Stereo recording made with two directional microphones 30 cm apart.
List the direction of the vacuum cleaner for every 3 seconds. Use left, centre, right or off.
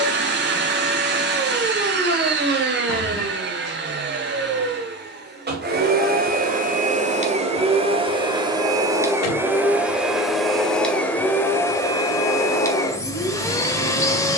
right, right, right, centre, centre.